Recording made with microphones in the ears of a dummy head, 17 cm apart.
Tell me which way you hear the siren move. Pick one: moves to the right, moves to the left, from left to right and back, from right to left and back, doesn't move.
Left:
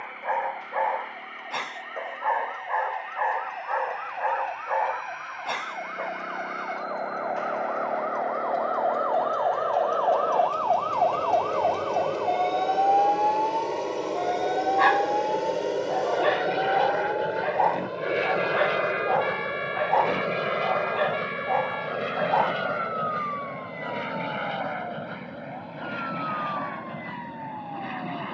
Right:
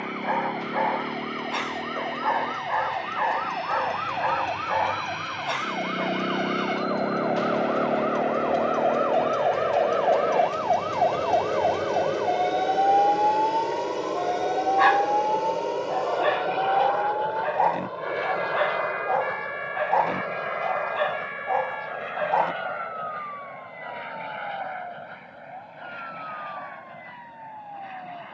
moves to the left.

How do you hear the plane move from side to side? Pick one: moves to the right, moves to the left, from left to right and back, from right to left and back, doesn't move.
moves to the left.